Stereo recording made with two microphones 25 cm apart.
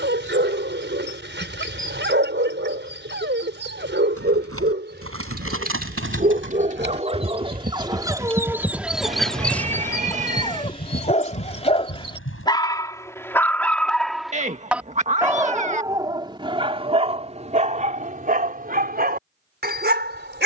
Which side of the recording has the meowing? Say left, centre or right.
right.